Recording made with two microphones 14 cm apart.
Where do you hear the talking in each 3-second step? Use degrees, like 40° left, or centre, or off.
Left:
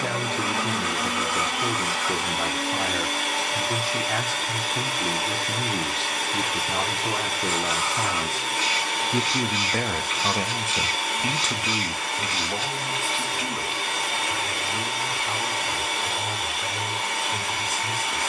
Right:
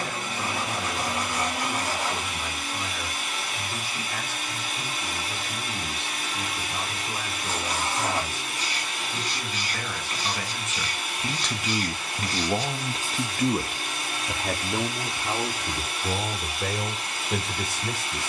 70° left, 70° left, 70° left, 30° left, 40° right, 60° right.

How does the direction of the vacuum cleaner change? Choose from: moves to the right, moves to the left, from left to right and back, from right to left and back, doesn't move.
doesn't move.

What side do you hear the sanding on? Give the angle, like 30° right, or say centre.
40° right.